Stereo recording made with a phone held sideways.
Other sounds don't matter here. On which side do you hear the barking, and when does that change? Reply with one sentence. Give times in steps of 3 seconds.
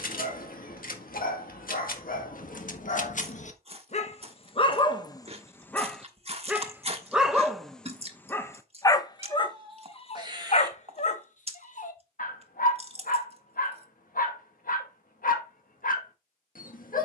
In this clip you hear the barking on the left from 0 s, in the centre from 6 s and on the left from 9 s.